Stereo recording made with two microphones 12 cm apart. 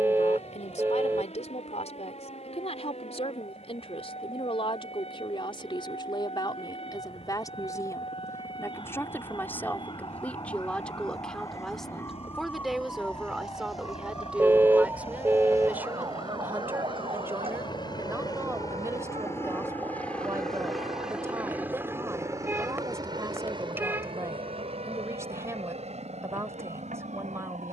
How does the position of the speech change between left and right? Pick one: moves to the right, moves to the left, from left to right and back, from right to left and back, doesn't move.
moves to the right.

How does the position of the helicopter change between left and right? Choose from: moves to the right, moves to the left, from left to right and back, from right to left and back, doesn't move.
moves to the right.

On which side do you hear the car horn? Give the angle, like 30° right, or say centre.
20° right.